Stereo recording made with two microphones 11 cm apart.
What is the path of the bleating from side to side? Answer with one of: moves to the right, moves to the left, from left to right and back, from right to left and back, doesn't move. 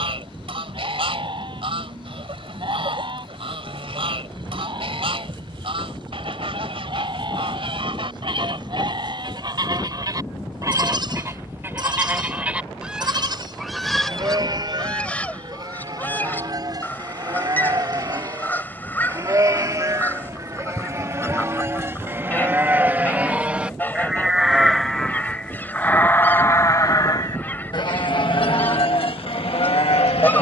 moves to the left.